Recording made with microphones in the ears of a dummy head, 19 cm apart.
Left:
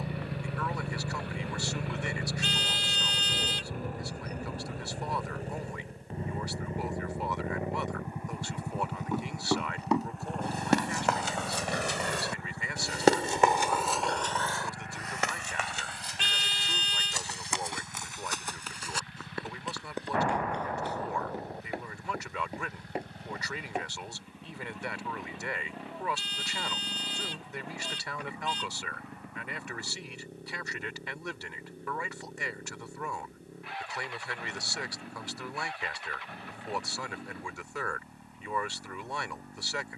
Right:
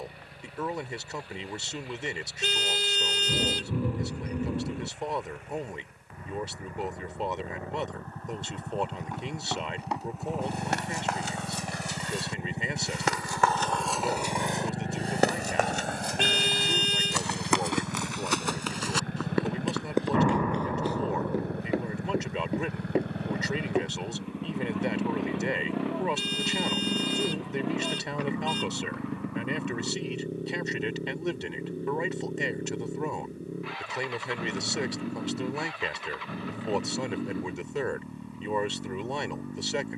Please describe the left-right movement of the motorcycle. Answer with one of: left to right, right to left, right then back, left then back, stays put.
left to right.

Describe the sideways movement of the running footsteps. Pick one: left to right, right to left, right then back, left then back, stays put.
left to right.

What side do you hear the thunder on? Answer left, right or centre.
right.